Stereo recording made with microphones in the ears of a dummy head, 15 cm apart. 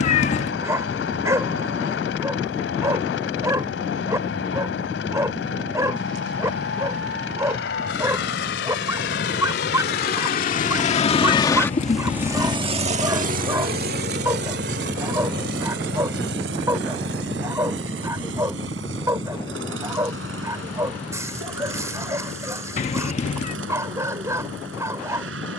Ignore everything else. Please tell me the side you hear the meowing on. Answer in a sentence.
You can hear the meowing on the left.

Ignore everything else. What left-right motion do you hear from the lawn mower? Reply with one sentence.
You can hear the lawn mower move to the right.